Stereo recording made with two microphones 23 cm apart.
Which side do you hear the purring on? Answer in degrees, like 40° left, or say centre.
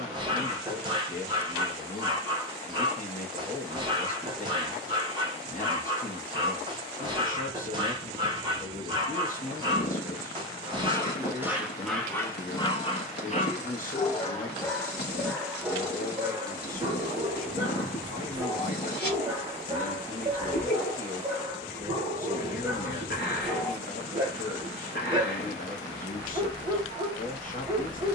50° left.